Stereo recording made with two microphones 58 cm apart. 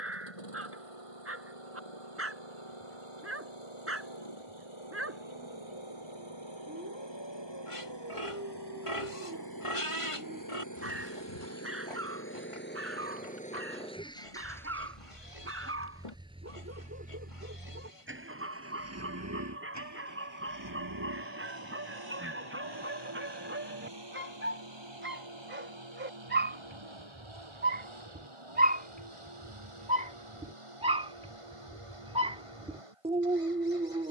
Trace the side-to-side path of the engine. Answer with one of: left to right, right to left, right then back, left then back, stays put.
left to right.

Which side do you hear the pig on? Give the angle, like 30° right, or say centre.
60° left.